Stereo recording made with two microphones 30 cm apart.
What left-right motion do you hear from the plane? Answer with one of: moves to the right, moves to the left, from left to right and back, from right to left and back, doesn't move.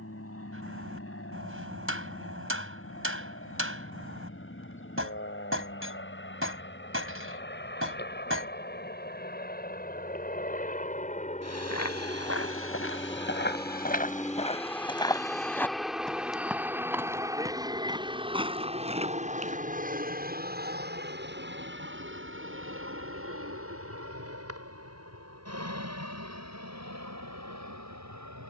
moves to the right.